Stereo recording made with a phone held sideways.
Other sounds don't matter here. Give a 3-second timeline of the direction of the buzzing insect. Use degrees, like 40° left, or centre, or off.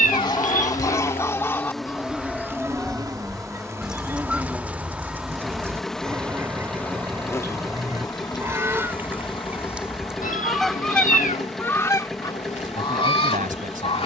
10° left, 10° right, 20° left, 40° left, 50° left.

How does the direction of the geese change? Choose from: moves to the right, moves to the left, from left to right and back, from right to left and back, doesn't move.
from left to right and back.